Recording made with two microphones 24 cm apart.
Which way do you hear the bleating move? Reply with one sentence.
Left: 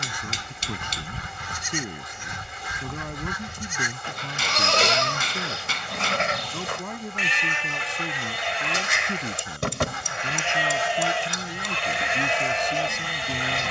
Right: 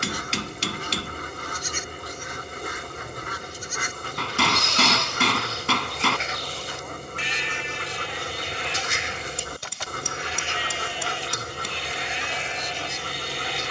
In this clip you hear the bleating stay in one place.